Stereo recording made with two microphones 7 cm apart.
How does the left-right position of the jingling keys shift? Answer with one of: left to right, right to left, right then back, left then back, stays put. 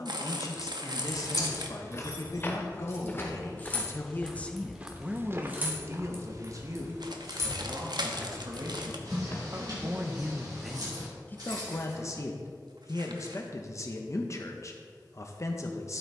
left to right.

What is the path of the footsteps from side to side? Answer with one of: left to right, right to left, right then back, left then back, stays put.
right then back.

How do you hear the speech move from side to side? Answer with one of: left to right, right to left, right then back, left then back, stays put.
right then back.